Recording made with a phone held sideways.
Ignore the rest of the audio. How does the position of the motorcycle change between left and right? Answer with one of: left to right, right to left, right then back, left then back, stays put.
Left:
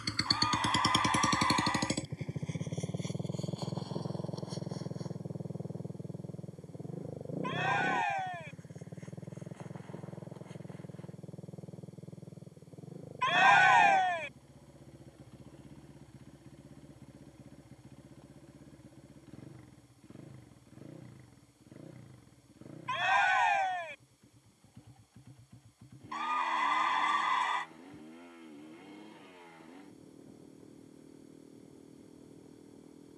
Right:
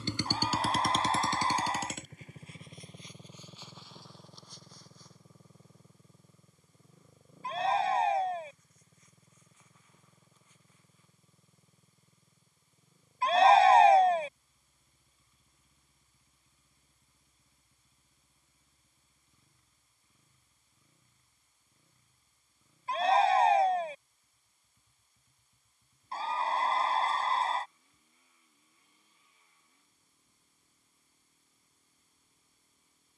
right to left.